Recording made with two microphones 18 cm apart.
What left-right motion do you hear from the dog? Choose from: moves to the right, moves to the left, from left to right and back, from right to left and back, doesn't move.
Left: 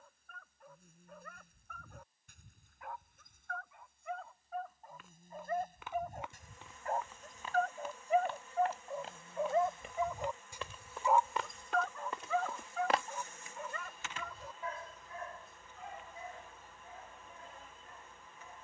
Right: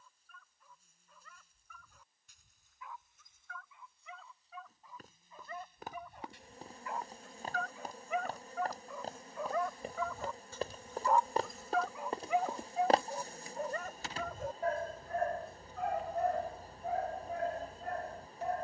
moves to the right.